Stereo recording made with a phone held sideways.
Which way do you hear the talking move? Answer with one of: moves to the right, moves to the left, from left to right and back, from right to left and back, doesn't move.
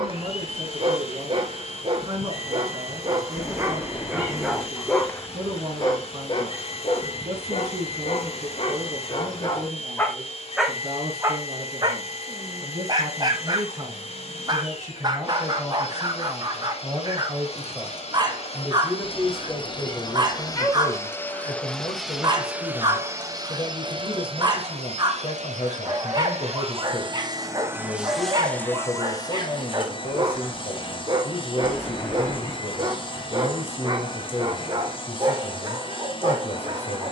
moves to the left.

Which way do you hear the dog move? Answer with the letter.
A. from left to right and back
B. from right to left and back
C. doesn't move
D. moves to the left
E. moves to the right
B.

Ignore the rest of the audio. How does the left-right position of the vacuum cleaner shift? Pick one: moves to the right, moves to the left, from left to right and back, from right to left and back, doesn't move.
from left to right and back.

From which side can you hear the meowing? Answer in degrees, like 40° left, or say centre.
20° left.